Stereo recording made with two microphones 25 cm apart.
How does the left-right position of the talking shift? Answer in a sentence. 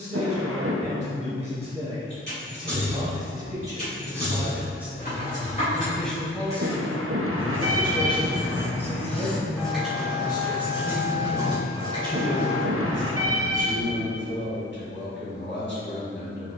In this clip you hear the talking travel towards the left.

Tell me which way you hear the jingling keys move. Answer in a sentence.
In this clip you hear the jingling keys move to the right.